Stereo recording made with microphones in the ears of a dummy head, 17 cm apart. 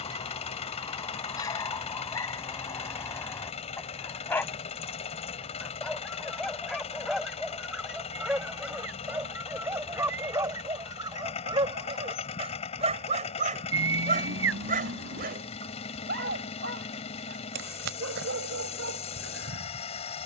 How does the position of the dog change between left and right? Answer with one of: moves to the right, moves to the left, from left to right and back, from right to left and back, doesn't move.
moves to the right.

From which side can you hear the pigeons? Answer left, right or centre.
right.